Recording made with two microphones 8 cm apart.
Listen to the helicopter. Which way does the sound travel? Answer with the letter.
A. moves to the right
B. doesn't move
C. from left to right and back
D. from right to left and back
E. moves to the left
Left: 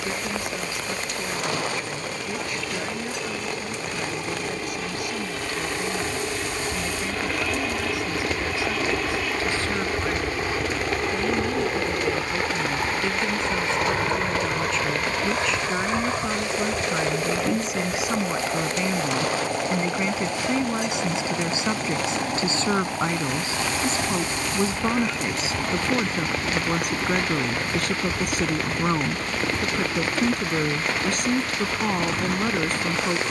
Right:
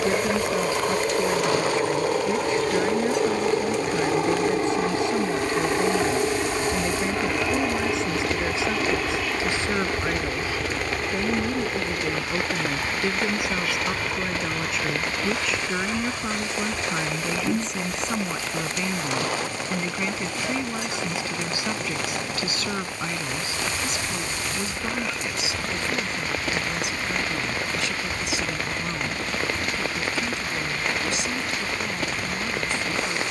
E.